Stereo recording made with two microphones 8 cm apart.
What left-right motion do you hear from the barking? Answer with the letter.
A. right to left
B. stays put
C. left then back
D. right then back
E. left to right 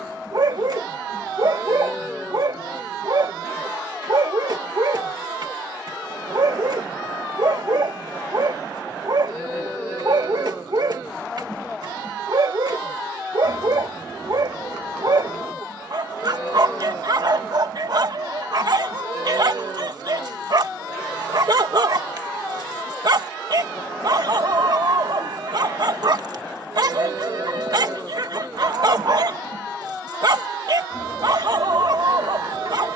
B.